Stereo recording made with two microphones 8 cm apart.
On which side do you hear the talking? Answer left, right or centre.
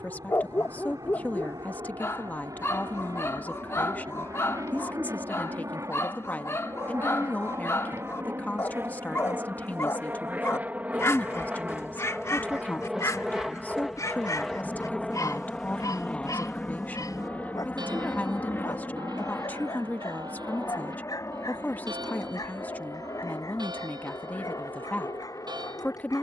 left.